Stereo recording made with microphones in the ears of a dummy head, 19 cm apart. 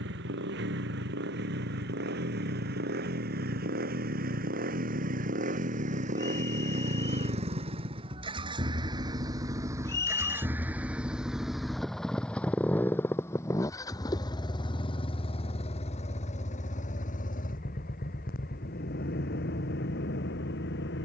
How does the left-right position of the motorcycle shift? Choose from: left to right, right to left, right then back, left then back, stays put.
right to left.